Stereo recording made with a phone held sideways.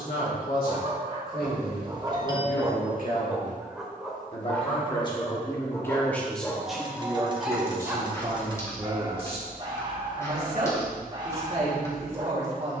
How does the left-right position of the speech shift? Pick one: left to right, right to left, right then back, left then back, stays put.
left to right.